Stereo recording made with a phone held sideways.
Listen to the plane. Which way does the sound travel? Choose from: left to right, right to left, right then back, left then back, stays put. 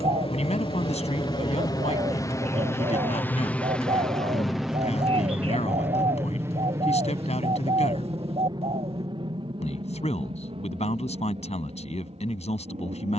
left to right.